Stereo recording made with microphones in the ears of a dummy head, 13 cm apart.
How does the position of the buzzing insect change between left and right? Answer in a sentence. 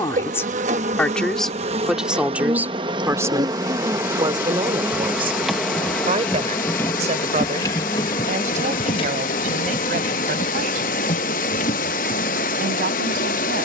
You can hear the buzzing insect move from right to left.